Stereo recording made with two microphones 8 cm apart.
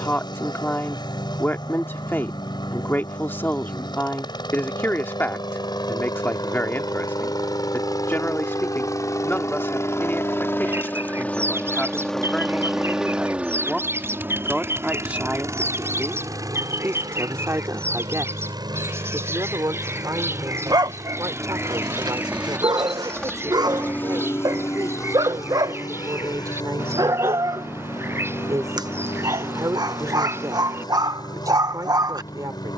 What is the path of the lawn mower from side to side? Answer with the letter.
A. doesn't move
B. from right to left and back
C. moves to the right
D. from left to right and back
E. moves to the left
D.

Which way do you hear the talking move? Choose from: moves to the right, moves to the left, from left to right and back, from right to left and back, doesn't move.
moves to the right.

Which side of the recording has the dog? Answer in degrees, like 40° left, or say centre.
60° right.